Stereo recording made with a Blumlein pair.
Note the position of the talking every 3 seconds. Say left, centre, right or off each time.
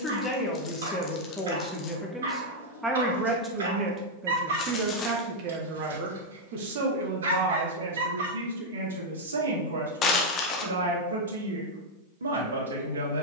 centre, right, right, right, right.